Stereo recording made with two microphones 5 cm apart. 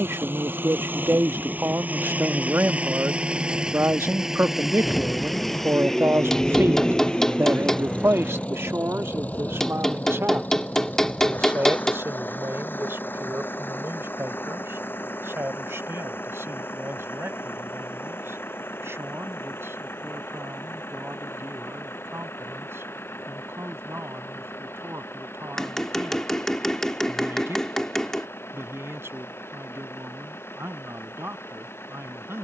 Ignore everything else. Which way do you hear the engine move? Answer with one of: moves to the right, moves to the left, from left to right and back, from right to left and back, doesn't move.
moves to the left.